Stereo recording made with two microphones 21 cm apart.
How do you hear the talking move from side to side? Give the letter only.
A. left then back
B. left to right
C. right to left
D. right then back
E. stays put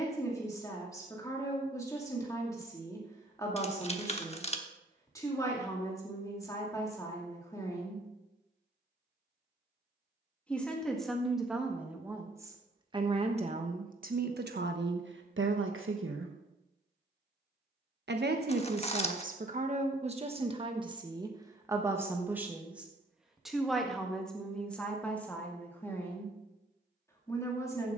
D.